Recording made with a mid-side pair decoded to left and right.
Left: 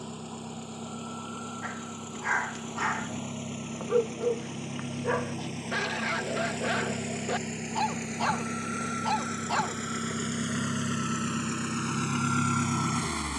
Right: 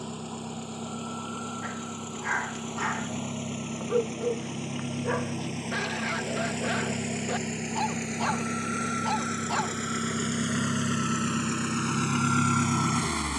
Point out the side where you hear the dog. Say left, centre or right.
centre.